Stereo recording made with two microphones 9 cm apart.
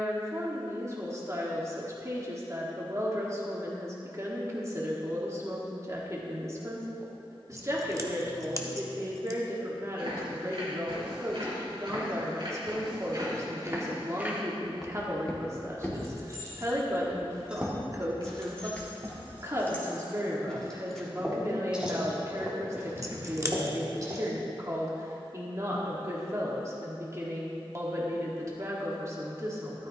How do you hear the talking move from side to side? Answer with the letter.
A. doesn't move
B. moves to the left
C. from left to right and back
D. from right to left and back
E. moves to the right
A.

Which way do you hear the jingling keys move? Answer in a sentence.
In this clip you hear the jingling keys go left and come back.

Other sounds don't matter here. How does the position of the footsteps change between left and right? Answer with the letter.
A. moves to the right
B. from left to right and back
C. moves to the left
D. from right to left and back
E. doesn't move
D.